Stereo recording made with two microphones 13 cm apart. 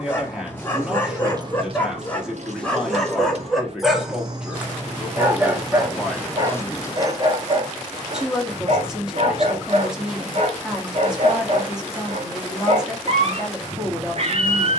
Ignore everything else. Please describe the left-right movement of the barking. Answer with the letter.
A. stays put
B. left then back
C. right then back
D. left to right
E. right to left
D.